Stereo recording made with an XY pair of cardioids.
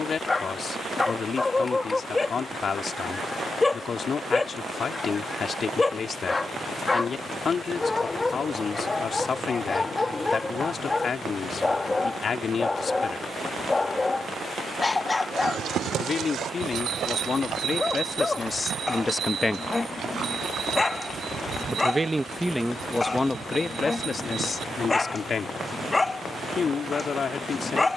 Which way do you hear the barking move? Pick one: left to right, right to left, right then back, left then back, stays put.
stays put.